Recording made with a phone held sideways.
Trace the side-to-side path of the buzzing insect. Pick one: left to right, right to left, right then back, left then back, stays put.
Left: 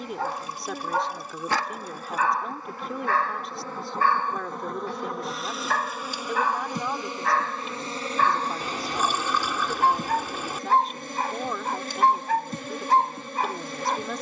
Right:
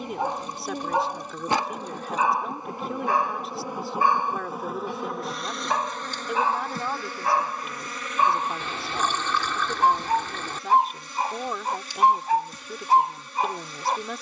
right to left.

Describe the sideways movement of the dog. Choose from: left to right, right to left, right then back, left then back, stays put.
stays put.